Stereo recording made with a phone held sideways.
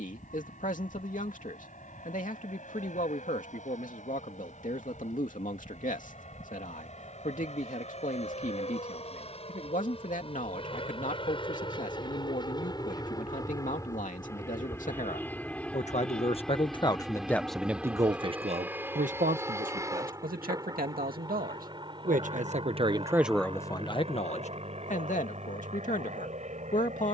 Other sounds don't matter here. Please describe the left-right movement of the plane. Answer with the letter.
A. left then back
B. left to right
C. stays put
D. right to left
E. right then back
B.